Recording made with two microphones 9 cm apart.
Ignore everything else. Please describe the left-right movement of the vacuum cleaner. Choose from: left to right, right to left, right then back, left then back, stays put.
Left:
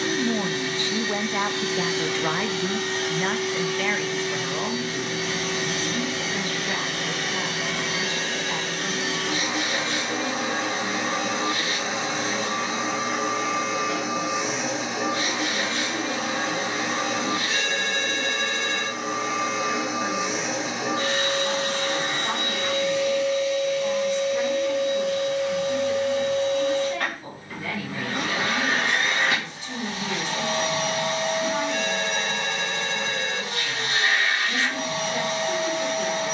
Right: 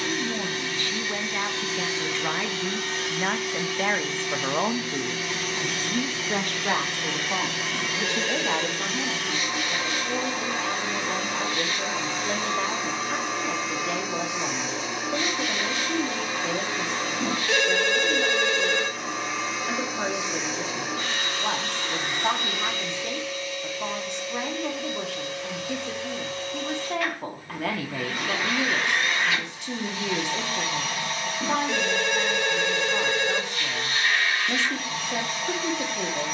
stays put.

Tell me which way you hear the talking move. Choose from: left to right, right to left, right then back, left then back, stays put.
left to right.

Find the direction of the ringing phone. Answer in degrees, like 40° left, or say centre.
70° right.